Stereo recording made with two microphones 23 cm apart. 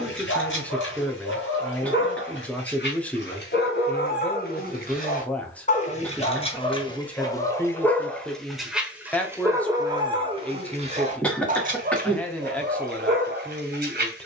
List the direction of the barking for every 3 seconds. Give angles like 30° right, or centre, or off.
50° left, 40° left, 10° left, 20° right, 40° right.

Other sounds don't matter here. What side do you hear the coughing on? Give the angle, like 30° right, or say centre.
centre.